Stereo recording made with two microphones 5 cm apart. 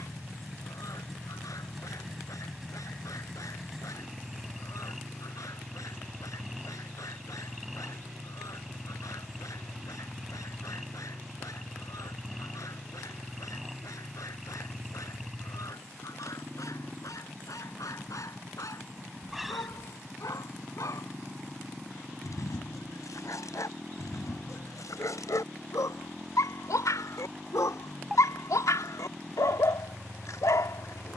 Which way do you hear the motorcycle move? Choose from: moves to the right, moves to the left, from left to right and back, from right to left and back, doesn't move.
doesn't move.